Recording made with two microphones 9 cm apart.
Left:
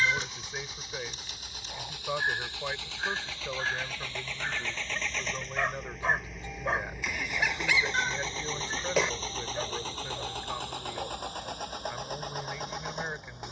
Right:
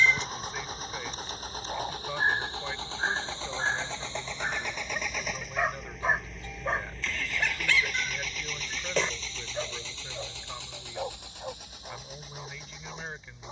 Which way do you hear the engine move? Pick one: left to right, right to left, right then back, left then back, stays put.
right to left.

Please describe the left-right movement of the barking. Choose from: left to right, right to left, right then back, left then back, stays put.
left then back.